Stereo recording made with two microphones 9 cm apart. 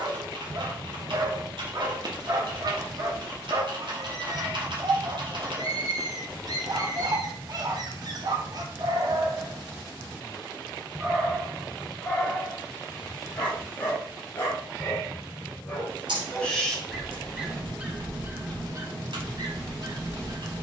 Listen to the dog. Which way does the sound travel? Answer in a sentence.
In this clip you hear the dog move from right to left and back again.